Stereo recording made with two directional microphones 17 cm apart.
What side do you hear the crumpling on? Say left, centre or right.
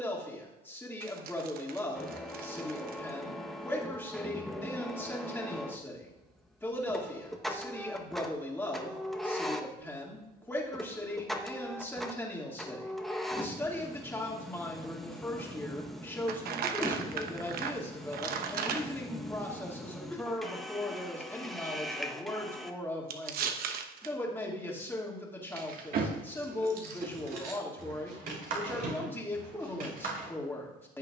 right.